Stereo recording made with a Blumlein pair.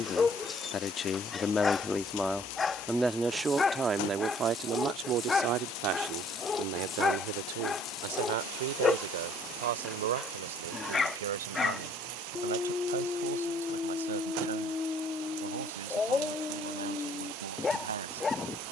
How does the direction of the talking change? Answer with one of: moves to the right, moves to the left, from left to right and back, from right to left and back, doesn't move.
moves to the right.